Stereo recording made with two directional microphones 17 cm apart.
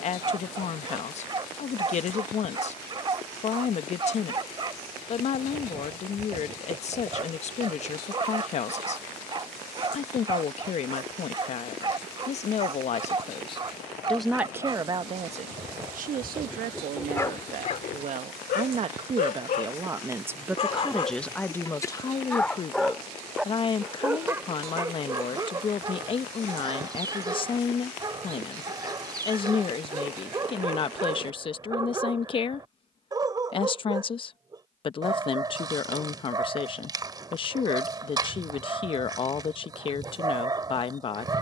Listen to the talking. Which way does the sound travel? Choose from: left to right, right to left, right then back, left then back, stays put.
right then back.